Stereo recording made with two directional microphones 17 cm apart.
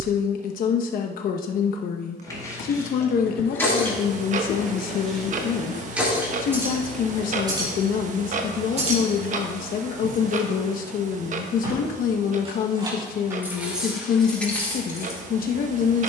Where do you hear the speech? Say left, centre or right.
left.